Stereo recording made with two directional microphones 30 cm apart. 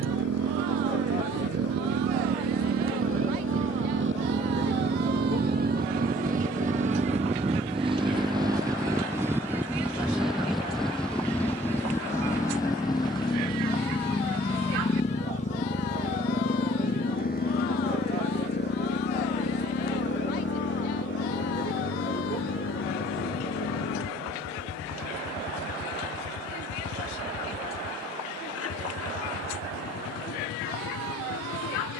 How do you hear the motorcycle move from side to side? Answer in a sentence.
You can hear the motorcycle travel towards the left.